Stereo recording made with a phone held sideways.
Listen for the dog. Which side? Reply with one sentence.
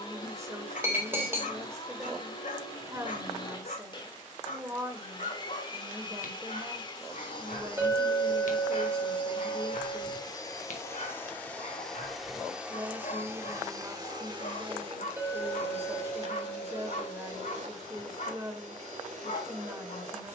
In this clip you hear the dog on the left.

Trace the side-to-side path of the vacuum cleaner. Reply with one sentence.
In this clip you hear the vacuum cleaner move from left to right.